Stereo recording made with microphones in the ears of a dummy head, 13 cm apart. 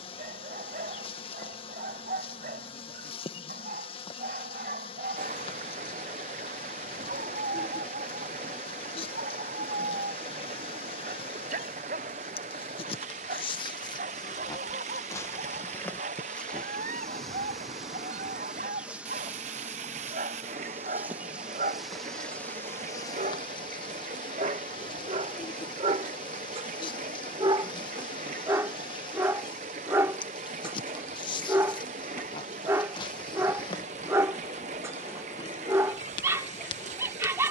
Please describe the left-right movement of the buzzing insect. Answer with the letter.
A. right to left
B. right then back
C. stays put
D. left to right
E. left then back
B.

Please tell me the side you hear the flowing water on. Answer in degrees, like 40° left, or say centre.
50° right.